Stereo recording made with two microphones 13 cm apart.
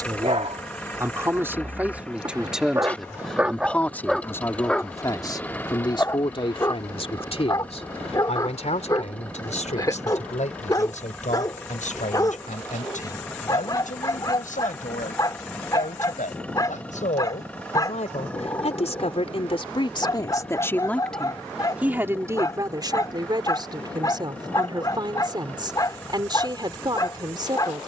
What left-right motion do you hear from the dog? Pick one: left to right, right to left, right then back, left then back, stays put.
right to left.